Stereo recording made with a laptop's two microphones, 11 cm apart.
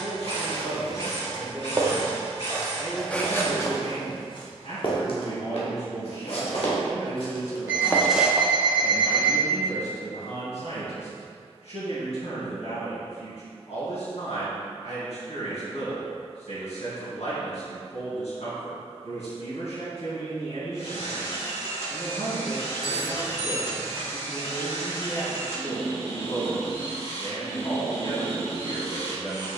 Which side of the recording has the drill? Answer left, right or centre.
left.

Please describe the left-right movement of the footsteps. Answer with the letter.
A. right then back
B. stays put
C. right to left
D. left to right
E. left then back
E.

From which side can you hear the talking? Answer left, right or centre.
left.